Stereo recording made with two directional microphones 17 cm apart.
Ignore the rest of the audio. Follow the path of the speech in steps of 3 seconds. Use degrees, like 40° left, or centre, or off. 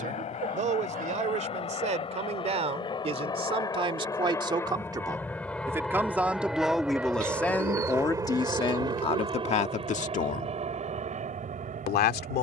40° right, 30° right, 10° left, 40° left.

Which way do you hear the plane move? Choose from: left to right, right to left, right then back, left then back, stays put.
left to right.